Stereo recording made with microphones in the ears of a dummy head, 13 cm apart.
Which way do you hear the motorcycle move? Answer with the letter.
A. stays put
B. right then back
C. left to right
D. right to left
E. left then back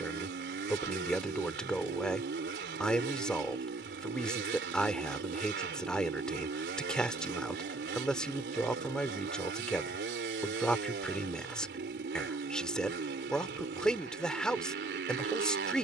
A.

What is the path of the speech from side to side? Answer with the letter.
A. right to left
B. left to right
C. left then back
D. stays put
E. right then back
D.